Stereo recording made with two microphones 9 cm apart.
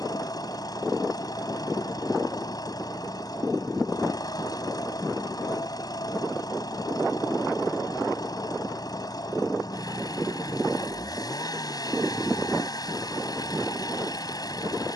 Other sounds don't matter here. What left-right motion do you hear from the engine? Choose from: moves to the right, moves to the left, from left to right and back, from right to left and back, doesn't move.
doesn't move.